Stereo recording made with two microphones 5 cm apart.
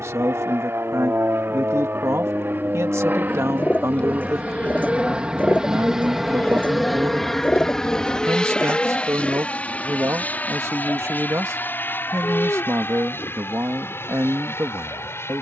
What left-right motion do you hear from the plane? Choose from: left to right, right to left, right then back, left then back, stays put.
right to left.